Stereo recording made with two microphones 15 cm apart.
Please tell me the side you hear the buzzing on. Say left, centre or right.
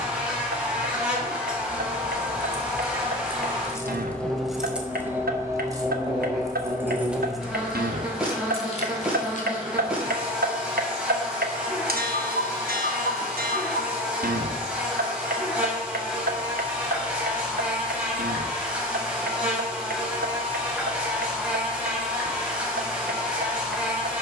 centre.